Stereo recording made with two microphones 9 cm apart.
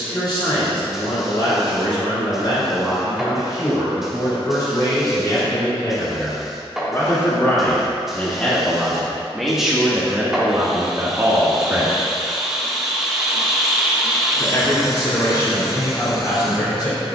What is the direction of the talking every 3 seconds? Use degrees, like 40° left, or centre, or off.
50° left, 40° left, 20° left, 20° right, 30° left, 40° left.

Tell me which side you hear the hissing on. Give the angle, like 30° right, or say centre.
centre.